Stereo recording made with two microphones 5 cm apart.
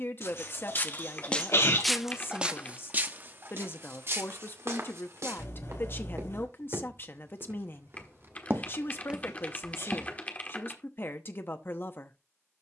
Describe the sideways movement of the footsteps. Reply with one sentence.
You can hear the footsteps go right and come back.